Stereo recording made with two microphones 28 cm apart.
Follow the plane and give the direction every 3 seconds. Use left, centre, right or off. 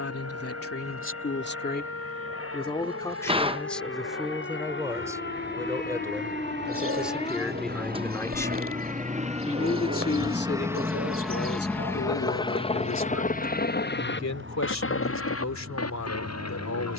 right, right, right, centre, left, left.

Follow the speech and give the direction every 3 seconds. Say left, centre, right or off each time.
left, centre, centre, left, left, left.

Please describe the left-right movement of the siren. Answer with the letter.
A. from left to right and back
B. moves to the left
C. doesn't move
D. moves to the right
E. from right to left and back
D.